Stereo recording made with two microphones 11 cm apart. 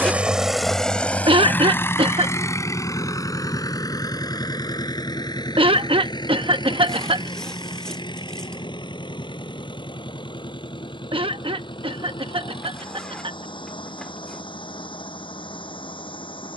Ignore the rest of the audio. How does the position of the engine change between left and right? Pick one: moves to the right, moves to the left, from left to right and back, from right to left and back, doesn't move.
moves to the left.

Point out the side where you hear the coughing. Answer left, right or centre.
right.